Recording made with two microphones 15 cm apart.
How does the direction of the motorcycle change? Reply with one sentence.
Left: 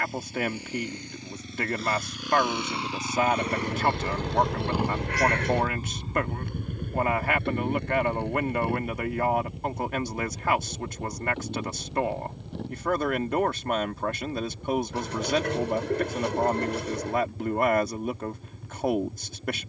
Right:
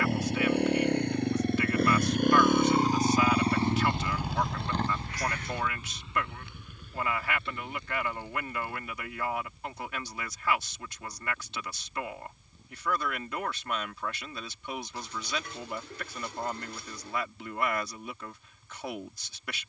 In this clip you hear the motorcycle travel towards the left.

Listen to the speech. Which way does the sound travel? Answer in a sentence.
In this clip you hear the speech stay in one place.